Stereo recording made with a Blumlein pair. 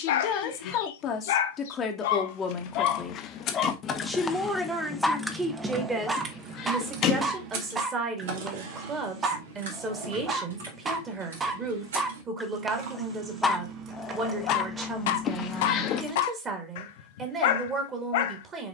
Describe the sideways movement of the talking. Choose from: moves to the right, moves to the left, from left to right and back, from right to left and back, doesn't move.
moves to the right.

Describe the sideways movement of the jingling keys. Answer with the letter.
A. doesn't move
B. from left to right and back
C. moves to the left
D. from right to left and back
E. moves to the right
B.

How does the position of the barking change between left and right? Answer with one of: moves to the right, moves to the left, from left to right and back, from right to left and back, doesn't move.
from left to right and back.